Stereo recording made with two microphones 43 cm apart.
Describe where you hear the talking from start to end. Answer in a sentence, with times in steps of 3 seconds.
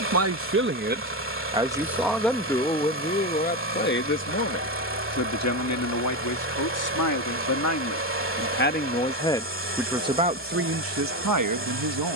In this clip you hear the talking in the centre from 0 s, on the left from 3 s and on the right from 9 s.